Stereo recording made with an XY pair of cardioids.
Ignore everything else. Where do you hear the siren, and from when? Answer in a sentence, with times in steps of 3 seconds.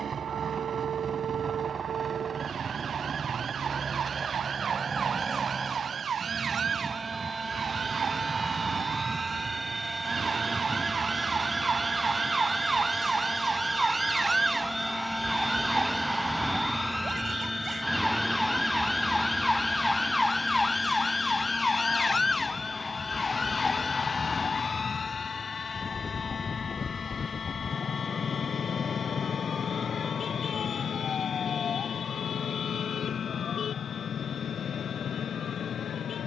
In this clip you hear the siren on the right from 0 s, in the centre from 15 s and on the left from 21 s.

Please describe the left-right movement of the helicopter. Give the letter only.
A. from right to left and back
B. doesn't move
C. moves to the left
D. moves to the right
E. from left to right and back
C.